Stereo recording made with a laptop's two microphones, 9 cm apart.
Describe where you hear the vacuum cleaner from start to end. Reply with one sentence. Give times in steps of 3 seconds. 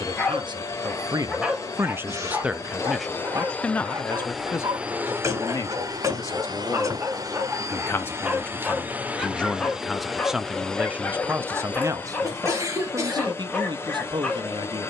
You can hear the vacuum cleaner on the left from 0 s, in the centre from 3 s, on the right from 6 s, in the centre from 9 s and on the left from 12 s.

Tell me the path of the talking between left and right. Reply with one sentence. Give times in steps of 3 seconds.
In this clip you hear the talking on the right from 0 s, on the left from 3 s, in the centre from 9 s and on the right from 12 s.